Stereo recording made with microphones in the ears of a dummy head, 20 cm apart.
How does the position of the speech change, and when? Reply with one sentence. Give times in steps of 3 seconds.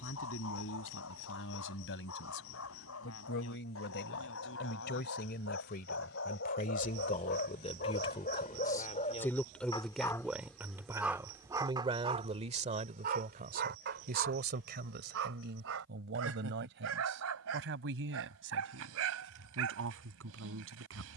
You can hear the speech on the left from 0 s, in the centre from 9 s and on the right from 12 s.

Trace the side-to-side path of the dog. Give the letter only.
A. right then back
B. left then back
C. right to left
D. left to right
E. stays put
D.